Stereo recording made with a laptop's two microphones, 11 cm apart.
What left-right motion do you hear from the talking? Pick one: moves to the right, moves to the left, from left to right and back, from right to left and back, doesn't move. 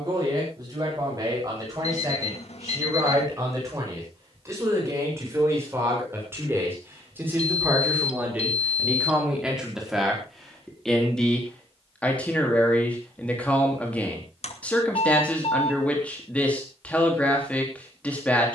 moves to the left.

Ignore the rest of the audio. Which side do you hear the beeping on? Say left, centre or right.
left.